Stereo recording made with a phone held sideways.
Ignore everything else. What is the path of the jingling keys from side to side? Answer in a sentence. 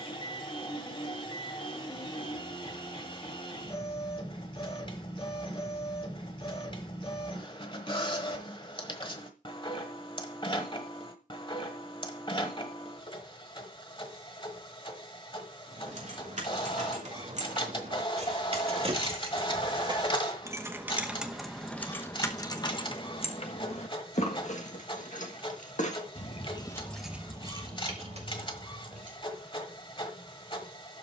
You can hear the jingling keys go left and come back.